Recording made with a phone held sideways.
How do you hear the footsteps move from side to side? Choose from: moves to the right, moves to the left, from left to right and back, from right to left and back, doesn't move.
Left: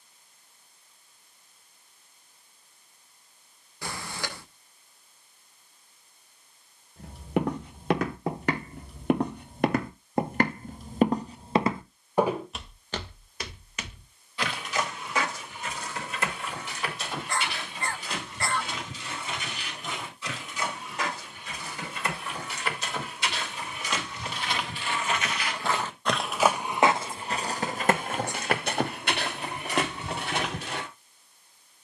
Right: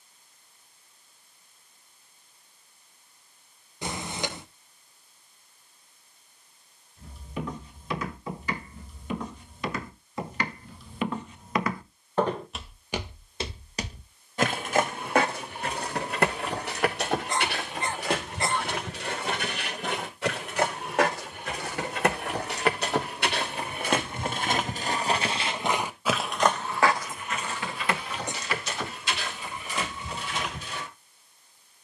from left to right and back.